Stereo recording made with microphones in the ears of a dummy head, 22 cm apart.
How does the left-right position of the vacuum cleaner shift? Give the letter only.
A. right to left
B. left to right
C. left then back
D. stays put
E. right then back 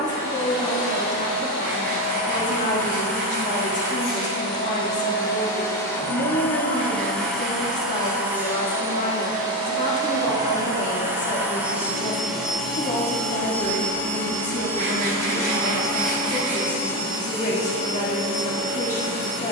E.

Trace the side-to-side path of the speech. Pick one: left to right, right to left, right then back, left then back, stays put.
stays put.